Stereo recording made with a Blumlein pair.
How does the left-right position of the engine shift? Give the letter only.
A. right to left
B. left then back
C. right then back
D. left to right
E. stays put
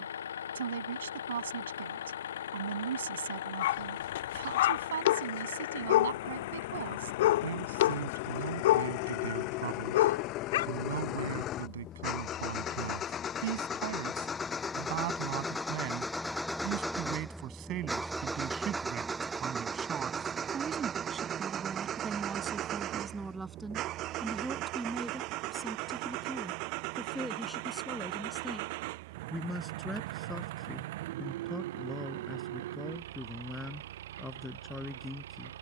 D.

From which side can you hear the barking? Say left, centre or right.
left.